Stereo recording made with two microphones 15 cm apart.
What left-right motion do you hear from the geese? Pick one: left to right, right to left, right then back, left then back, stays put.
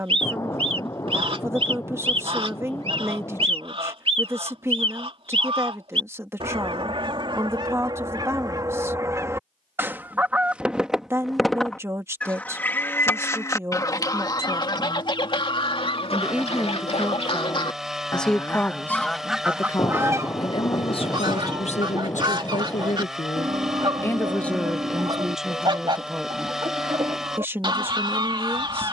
left then back.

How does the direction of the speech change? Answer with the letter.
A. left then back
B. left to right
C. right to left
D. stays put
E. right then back
A.